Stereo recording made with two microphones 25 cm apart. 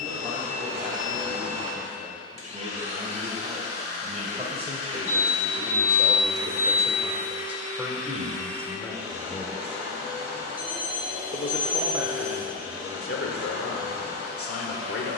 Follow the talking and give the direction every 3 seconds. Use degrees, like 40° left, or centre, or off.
40° right, 30° right, 10° right, 30° left, 60° left.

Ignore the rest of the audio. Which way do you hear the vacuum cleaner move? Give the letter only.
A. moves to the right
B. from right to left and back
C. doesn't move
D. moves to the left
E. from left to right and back
C.